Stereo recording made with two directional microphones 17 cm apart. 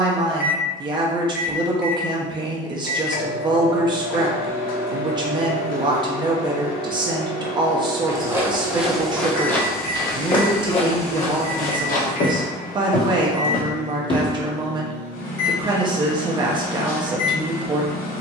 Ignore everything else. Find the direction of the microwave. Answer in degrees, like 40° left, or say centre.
60° left.